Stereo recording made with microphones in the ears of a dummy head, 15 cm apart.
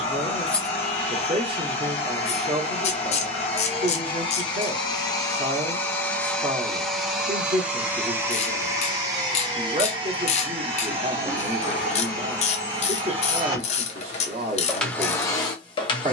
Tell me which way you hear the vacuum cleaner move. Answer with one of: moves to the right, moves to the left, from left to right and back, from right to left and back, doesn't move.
from left to right and back.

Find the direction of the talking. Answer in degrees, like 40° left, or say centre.
40° right.